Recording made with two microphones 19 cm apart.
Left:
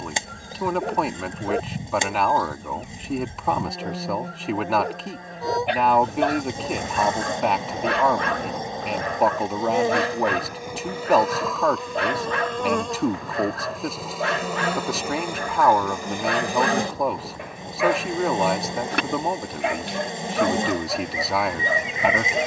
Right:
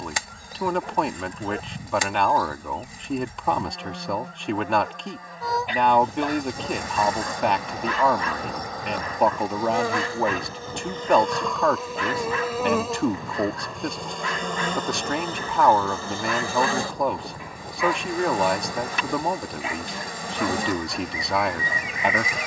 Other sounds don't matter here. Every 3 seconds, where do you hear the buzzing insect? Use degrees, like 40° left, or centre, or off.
30° left, 30° left, 30° left, 10° left, centre, 20° left, 20° left, 20° left.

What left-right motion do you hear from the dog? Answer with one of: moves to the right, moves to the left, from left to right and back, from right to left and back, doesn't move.
doesn't move.